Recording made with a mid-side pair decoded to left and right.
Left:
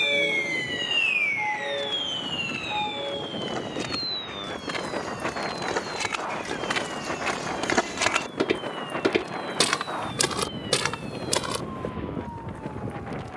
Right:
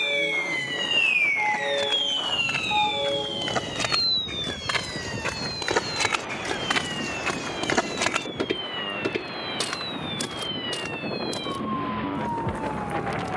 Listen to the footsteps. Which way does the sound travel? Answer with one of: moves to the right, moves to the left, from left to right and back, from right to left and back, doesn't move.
moves to the left.